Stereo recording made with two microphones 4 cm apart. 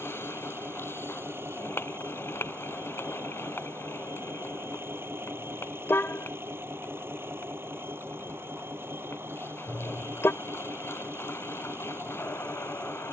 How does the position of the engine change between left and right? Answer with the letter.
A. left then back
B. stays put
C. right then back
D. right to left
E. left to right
B.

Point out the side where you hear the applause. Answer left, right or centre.
left.